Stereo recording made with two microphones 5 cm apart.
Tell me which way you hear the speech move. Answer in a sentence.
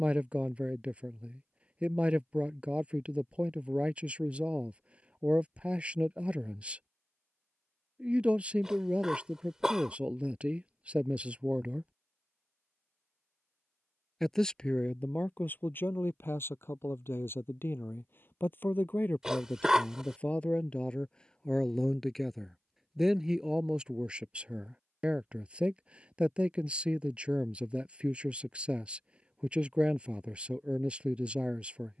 In this clip you hear the speech move from right to left and back again.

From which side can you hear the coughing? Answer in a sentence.
You can hear the coughing in the centre.